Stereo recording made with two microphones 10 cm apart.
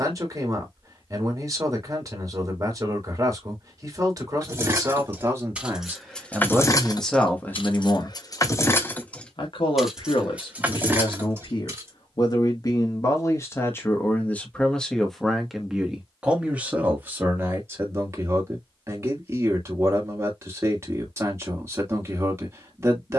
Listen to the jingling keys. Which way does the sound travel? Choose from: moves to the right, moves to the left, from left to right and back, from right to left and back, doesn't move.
from right to left and back.